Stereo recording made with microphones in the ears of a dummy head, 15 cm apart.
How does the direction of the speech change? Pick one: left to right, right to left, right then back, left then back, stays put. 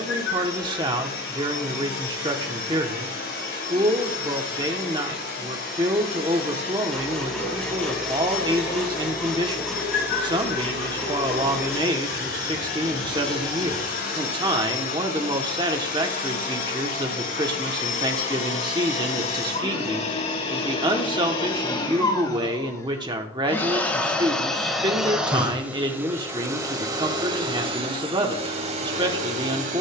stays put.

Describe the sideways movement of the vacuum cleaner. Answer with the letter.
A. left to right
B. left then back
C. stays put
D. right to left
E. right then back
A.